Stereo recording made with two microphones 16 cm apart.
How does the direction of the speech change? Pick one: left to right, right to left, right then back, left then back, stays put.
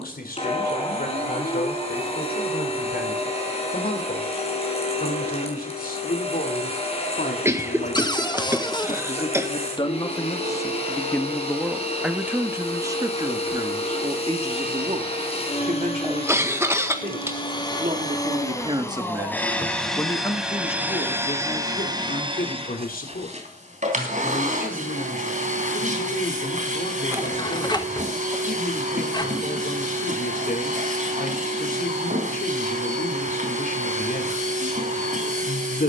right then back.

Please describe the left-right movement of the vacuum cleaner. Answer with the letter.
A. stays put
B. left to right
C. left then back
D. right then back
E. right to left
B.